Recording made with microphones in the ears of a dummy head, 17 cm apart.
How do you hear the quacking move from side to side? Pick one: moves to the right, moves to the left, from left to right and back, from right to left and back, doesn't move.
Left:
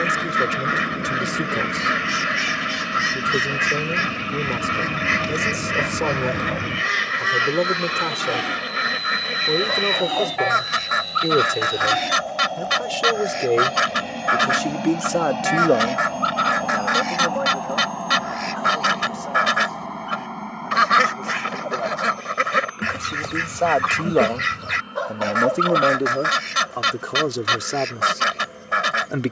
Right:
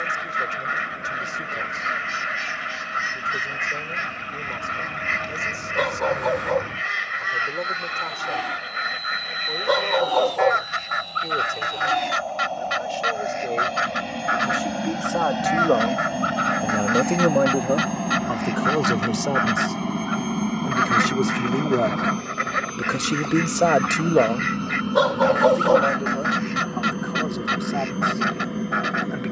doesn't move.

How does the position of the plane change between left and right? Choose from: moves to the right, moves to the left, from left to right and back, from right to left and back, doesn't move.
moves to the right.